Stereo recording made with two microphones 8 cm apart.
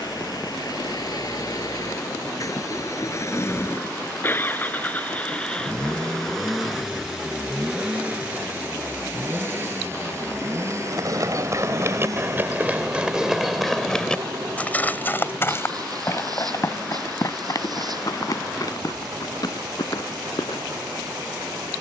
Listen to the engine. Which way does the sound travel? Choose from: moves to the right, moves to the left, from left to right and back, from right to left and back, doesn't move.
moves to the right.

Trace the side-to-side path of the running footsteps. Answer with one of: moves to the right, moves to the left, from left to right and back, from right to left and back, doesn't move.
moves to the left.